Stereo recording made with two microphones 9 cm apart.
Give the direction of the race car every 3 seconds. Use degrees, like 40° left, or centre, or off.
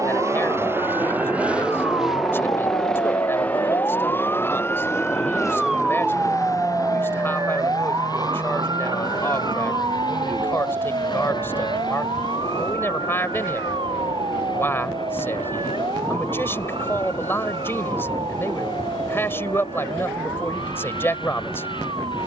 10° right, 20° left, 40° left, 50° left, 60° left, 60° left, 60° left, 60° left.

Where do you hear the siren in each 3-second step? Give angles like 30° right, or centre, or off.
70° left, 20° left, 40° right, 60° right, 70° right, 70° right, 70° right, 80° right.